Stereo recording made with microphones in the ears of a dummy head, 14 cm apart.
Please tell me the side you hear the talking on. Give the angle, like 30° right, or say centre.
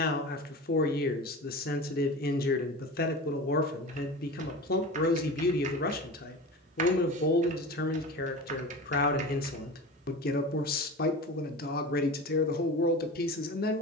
60° left.